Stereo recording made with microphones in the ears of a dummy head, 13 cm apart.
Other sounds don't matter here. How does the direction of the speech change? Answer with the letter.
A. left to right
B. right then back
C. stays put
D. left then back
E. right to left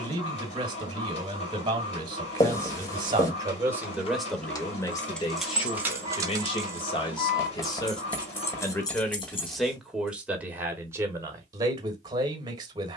D.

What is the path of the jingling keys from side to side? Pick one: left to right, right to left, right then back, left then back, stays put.
right then back.